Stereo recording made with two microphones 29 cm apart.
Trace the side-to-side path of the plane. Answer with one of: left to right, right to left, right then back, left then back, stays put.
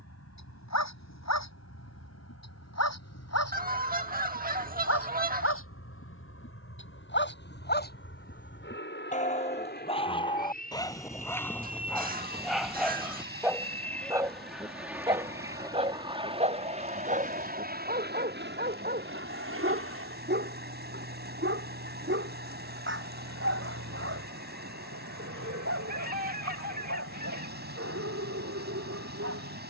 left to right.